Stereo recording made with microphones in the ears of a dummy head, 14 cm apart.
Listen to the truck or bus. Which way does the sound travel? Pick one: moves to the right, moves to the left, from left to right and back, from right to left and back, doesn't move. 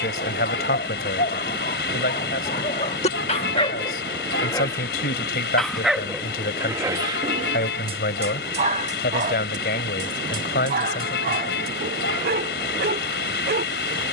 doesn't move.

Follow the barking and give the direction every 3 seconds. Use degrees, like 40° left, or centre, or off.
50° left, 20° left, 30° right, 60° right, 70° right.